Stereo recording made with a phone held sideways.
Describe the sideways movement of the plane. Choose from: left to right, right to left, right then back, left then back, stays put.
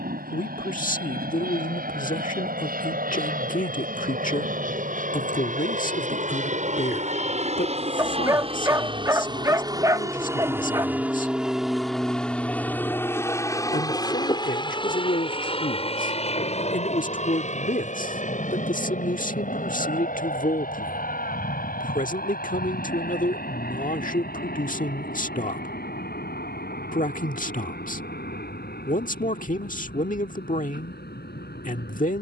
right to left.